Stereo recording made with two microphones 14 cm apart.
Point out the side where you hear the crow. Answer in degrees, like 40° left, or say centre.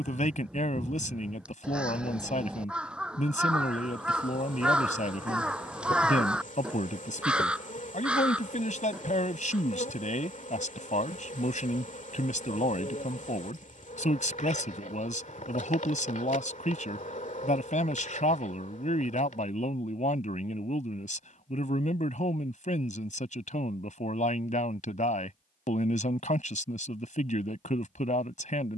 10° right.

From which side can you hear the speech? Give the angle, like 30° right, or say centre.
60° left.